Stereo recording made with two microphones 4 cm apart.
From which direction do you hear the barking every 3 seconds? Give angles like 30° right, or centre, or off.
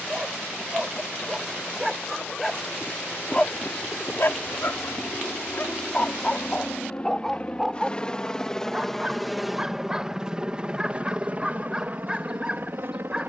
centre, 50° left, 10° left, 20° right, 20° right.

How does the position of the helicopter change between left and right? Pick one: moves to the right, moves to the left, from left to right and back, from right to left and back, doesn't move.
moves to the right.